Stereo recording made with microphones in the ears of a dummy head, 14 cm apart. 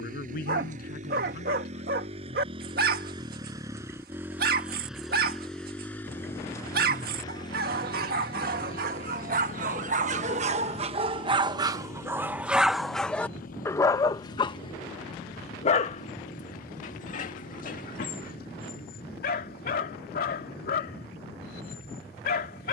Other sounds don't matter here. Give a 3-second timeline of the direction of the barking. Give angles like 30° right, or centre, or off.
60° right, 60° right, 60° right, 40° right, 10° left, 50° left, 60° left, 60° left.